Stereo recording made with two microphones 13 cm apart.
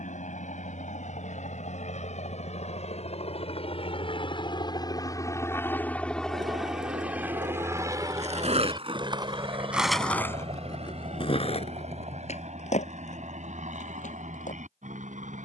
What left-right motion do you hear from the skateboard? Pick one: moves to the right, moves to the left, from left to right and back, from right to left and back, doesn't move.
moves to the left.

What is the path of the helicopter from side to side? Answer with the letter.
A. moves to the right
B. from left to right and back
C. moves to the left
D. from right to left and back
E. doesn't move
A.